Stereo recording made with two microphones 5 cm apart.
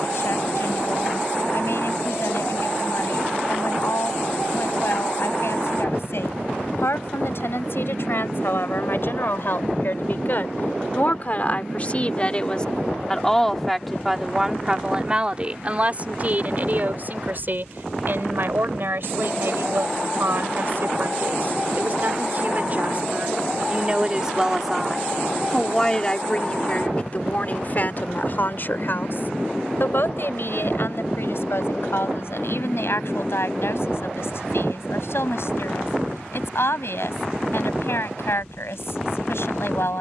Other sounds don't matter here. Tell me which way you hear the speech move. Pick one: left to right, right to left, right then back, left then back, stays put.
right then back.